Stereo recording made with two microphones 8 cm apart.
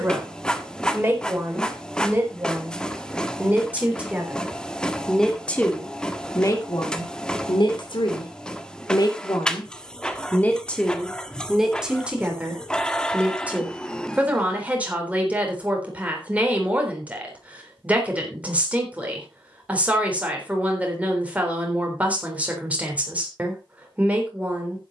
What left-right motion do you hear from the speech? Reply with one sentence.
You can hear the speech go left and come back.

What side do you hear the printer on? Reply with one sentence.
You can hear the printer in the centre.